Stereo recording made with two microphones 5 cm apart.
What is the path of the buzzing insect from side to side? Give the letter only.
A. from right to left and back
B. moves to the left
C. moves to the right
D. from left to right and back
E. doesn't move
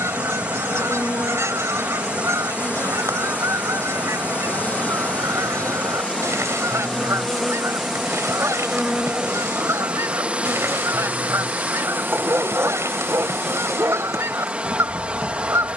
C.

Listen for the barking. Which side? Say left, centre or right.
right.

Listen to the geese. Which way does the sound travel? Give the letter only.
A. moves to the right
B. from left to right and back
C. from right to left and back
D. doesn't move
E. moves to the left
D.